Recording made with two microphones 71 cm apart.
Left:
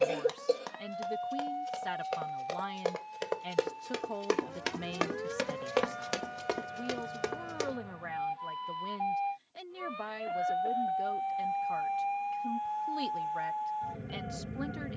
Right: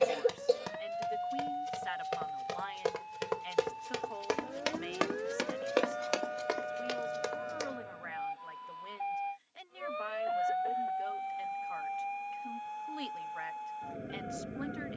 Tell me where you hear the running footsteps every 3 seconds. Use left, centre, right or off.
right, centre, left, off, off.